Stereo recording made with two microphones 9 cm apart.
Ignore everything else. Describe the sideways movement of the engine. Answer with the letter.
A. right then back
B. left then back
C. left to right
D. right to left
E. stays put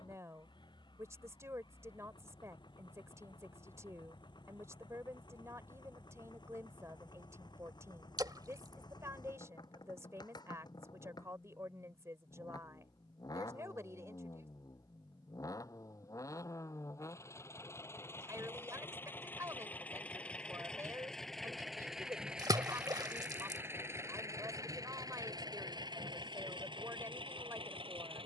C.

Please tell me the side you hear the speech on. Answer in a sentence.
You can hear the speech on the right.